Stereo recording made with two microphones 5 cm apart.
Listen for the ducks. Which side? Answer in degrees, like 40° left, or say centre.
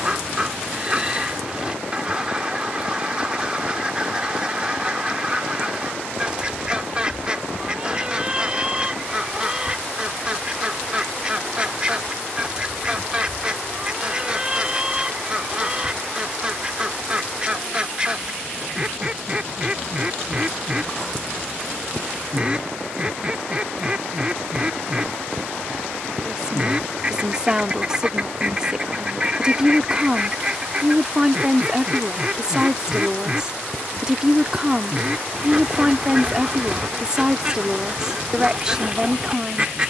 20° right.